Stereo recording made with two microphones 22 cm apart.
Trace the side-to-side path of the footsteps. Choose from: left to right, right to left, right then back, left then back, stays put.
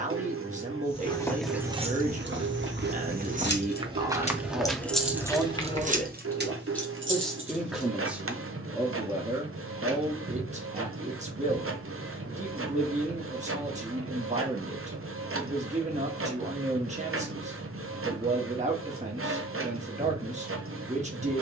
right then back.